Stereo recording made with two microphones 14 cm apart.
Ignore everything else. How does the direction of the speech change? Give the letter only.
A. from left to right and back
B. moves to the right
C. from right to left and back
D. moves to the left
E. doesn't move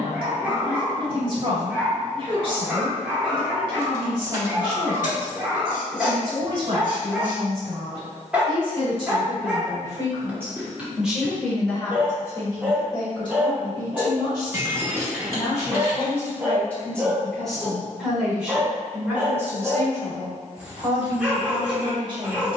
C.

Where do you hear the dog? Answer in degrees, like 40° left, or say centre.
10° right.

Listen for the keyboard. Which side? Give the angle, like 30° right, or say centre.
20° right.